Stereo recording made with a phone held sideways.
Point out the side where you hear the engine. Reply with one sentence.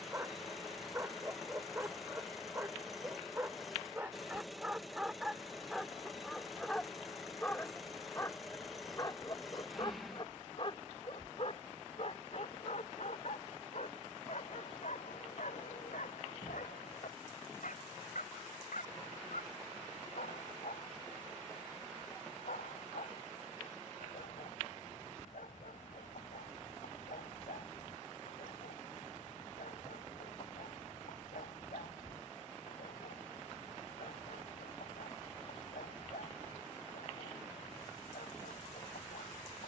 You can hear the engine in the centre.